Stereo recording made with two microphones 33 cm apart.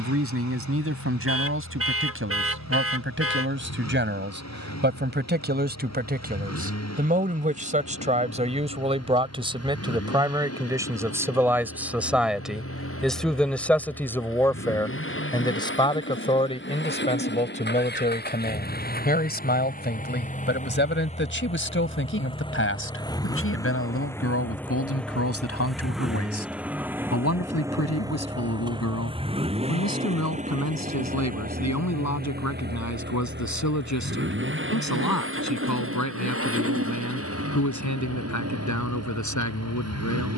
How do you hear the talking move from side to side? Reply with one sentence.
You can hear the talking move from right to left.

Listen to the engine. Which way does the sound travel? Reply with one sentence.
In this clip you hear the engine travel towards the right.